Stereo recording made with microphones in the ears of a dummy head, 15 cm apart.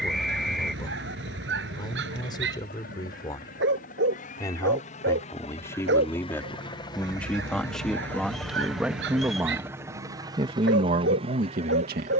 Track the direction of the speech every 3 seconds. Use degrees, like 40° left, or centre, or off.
30° left, 20° left, centre, 40° right.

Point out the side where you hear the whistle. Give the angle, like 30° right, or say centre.
centre.